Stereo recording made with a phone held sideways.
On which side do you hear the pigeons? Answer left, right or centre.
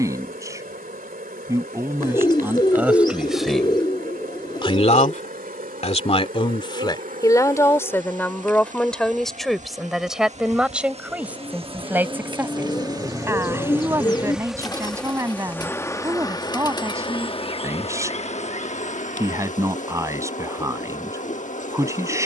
left.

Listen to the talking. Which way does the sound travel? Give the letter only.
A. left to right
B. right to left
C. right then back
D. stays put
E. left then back
E.